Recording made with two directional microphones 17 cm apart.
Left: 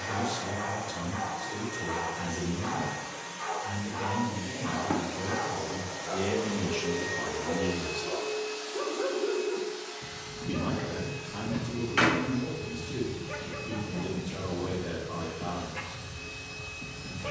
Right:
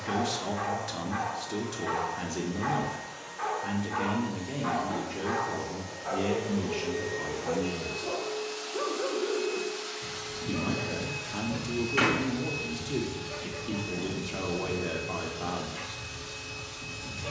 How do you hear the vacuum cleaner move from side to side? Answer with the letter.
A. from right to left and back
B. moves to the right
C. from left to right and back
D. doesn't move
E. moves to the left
B.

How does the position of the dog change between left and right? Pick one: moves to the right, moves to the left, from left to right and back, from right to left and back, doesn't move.
moves to the left.